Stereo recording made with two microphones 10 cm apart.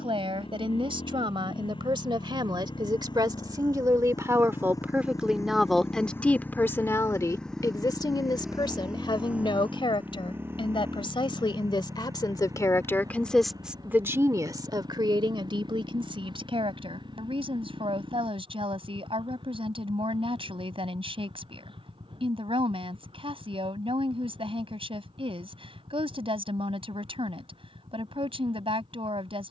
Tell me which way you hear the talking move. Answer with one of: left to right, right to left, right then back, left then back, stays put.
left then back.